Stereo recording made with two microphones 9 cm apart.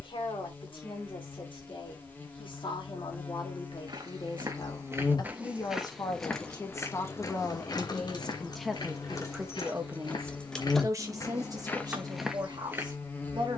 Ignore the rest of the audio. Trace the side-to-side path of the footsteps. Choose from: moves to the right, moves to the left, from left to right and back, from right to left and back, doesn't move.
from right to left and back.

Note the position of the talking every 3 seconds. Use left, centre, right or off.
left, left, left, right, right.